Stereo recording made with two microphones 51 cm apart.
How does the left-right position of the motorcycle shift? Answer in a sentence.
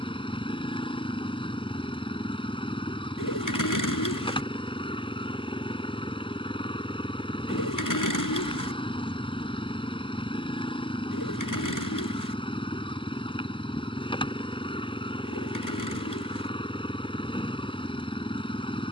You can hear the motorcycle stay in one place.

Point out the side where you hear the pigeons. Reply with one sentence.
In this clip you hear the pigeons on the left.